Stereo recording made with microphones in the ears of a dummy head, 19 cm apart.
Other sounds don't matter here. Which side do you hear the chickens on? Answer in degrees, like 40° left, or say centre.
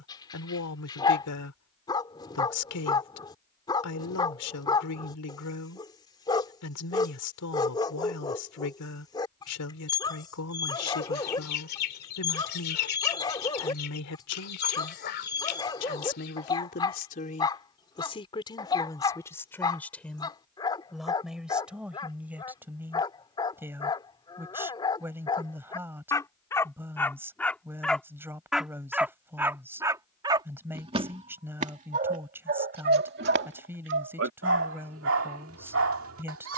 50° left.